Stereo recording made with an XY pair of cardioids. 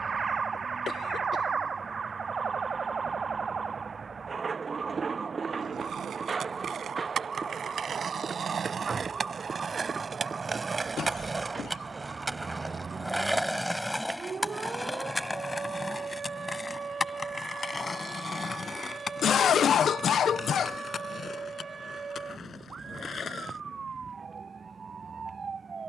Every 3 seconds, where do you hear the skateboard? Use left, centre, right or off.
off, right, right, right, centre, left, left, left, off.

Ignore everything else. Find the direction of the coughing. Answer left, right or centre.
left.